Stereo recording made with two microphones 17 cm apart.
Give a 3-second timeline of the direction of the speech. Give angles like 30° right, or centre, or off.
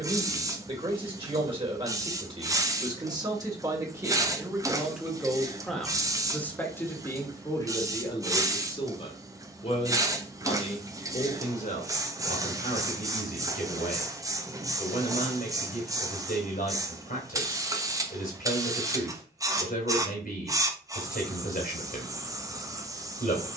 30° right, 10° right, 20° left, 50° left, 60° left, 60° left, 60° left, 60° left.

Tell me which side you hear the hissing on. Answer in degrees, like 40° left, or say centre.
20° right.